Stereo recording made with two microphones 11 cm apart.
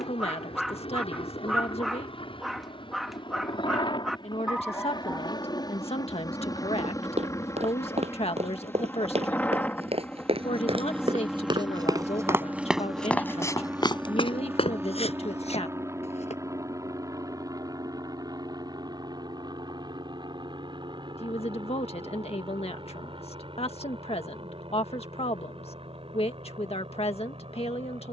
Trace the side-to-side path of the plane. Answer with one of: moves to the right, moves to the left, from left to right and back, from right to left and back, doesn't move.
moves to the right.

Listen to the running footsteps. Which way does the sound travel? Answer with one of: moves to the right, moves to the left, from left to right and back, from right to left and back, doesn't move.
moves to the left.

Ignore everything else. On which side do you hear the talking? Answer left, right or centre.
left.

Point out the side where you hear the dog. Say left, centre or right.
centre.